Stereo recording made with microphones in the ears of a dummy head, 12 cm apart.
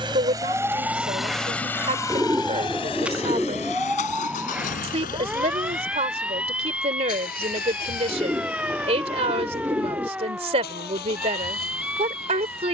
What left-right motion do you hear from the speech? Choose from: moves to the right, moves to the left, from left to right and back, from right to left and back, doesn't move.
doesn't move.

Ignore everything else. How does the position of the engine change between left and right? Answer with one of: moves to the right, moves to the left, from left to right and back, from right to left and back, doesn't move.
moves to the left.